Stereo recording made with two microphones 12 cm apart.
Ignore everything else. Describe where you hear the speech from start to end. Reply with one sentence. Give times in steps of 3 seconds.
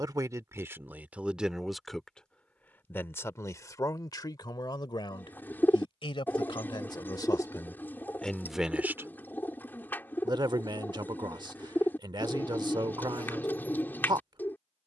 In this clip you hear the speech in the centre from 0 s, on the left from 3 s and on the right from 9 s.